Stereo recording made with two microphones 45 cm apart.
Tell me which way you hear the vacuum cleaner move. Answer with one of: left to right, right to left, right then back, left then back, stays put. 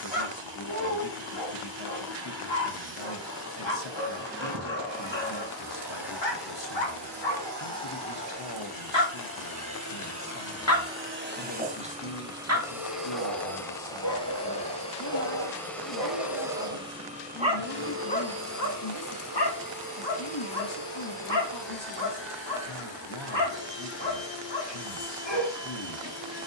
left then back.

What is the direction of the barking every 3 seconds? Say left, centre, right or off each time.
left, left, left, left, right, right, left, left, left.